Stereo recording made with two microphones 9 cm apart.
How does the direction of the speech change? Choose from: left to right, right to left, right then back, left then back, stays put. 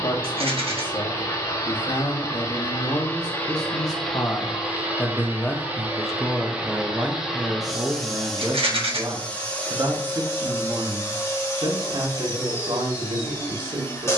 left to right.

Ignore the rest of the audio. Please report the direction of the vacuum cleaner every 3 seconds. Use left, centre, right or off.
left, centre, centre, left, left.